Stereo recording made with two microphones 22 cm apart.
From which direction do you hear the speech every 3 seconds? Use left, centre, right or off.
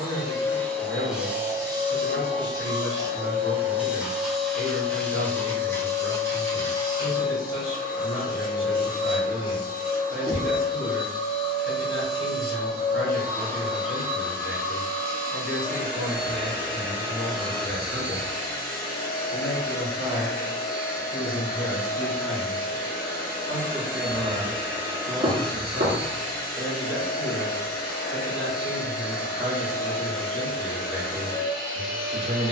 left, left, left, left, left, left, left, centre, right, right, right.